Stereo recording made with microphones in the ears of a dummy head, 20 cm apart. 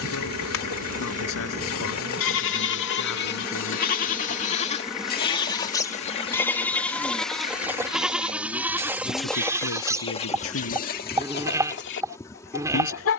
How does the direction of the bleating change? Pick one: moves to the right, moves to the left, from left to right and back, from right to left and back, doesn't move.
moves to the right.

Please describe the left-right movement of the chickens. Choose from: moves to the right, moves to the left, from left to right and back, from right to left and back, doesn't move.
from left to right and back.